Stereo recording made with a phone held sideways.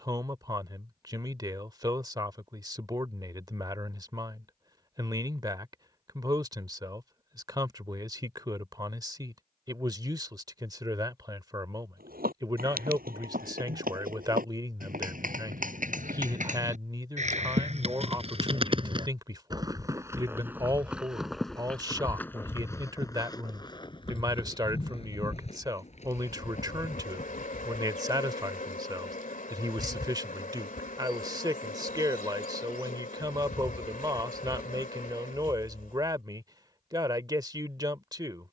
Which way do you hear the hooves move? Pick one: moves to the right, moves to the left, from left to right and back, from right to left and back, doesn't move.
moves to the left.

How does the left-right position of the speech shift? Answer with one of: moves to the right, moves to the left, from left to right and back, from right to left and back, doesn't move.
doesn't move.